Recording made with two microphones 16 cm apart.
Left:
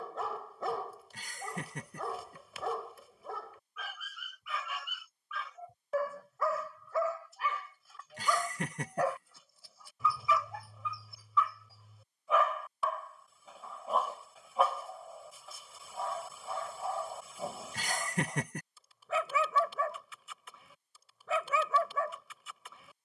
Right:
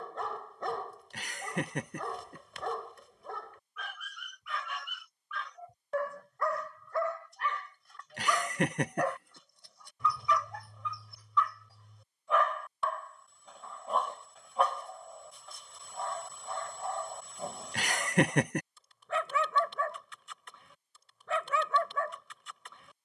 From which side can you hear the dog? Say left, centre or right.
centre.